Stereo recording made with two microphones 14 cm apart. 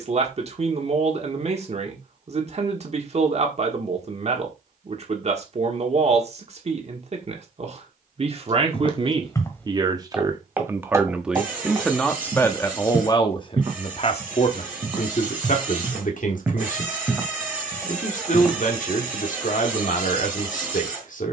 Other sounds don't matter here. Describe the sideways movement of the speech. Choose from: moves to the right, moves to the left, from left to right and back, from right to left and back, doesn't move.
moves to the left.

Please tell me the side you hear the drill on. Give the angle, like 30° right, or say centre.
10° right.